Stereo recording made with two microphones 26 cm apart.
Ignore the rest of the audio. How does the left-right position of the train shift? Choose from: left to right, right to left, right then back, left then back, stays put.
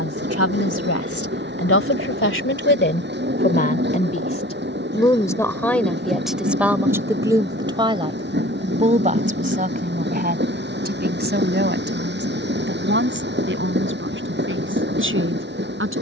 stays put.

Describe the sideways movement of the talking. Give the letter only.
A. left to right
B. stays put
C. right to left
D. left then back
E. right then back
A.